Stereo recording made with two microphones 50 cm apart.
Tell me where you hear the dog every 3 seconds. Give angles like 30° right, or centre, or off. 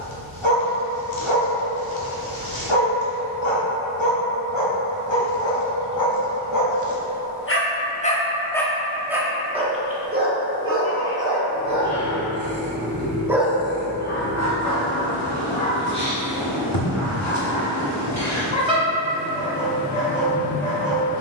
70° left, 60° left, 30° left, 20° right, 10° left, 60° left, 60° left.